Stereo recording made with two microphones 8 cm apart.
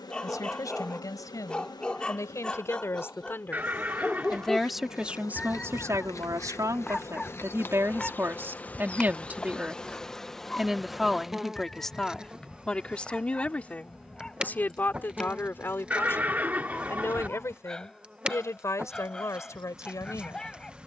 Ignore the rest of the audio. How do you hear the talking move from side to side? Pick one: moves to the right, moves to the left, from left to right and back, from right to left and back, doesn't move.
from left to right and back.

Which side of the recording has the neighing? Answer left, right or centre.
right.